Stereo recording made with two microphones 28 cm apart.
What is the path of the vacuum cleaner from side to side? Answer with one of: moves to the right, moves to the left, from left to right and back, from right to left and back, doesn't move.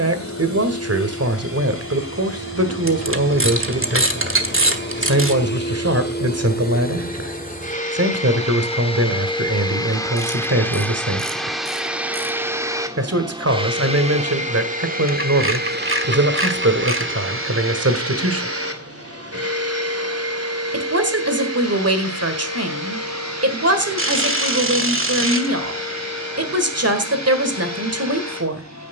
moves to the right.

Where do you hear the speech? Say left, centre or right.
right.